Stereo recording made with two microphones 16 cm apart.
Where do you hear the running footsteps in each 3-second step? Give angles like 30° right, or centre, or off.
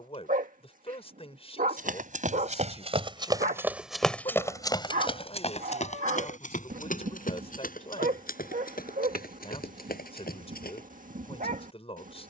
50° right, 10° left, 60° left, 70° left.